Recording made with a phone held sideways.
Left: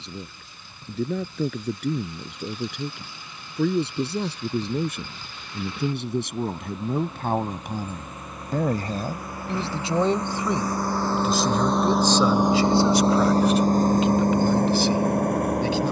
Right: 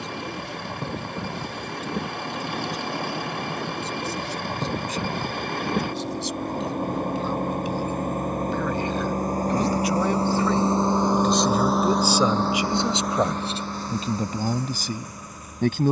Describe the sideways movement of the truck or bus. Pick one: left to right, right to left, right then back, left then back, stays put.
right to left.